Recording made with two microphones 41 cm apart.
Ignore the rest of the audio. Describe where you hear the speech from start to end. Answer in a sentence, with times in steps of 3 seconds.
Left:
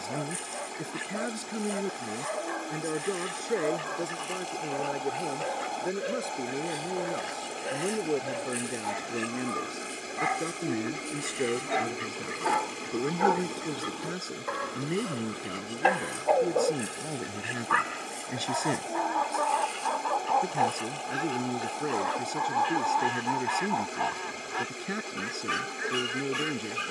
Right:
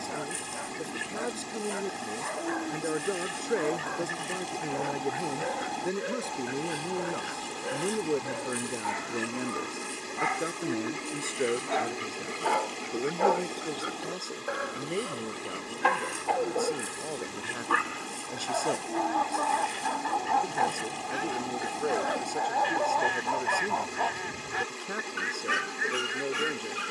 You can hear the speech on the left from 0 s, in the centre from 3 s and on the left from 12 s.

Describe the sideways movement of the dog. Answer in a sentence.
In this clip you hear the dog go right and come back.